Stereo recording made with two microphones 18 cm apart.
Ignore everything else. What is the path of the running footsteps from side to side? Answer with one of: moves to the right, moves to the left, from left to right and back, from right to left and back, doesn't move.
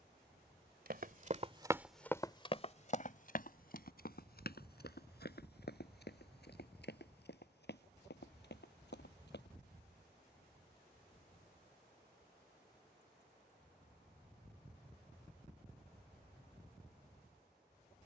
moves to the left.